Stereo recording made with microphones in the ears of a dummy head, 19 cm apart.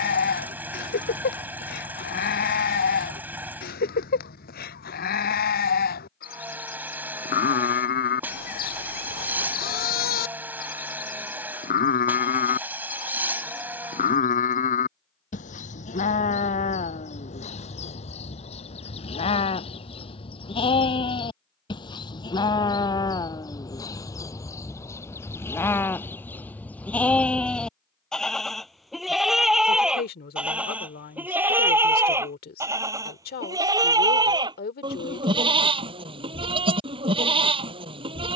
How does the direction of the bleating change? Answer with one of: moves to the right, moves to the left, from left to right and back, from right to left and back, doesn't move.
moves to the right.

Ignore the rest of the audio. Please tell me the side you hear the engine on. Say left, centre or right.
centre.